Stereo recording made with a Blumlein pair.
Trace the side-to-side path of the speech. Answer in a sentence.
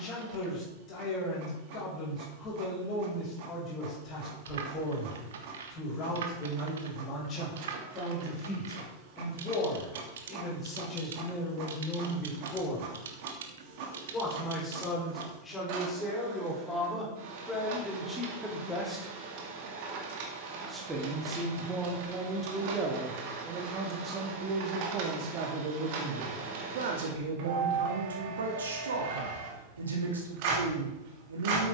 In this clip you hear the speech go from the left side to the right.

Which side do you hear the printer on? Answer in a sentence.
In this clip you hear the printer on the right.